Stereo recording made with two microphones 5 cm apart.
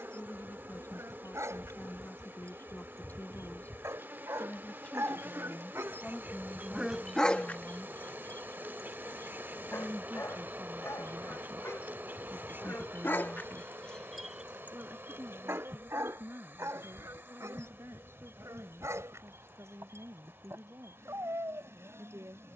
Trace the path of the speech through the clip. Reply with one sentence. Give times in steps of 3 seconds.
In this clip you hear the speech on the left from 0 s, in the centre from 6 s and on the right from 9 s.